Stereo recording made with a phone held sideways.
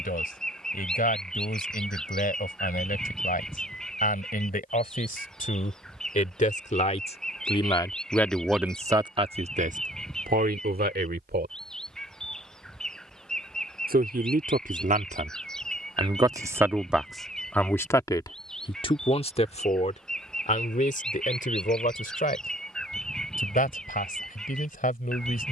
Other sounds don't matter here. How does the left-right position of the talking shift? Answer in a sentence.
You can hear the talking go right and come back.